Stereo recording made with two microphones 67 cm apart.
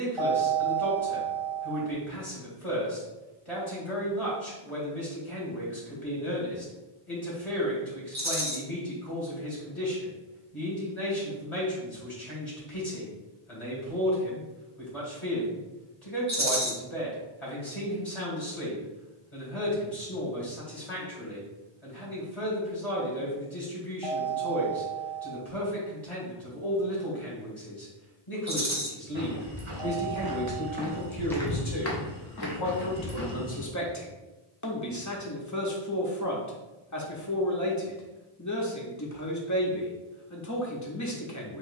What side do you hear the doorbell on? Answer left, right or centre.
right.